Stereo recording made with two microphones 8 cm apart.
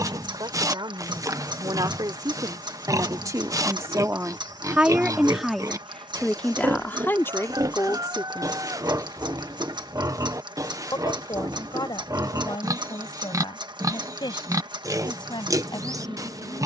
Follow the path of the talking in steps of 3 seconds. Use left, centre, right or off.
right, right, left, left, left, left.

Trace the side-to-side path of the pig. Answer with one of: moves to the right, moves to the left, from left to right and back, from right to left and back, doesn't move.
doesn't move.